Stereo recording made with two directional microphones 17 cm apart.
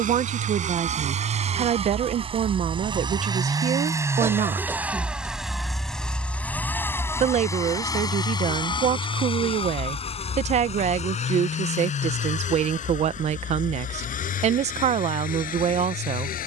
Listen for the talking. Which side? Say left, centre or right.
right.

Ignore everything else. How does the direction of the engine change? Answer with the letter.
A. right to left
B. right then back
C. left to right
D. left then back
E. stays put
A.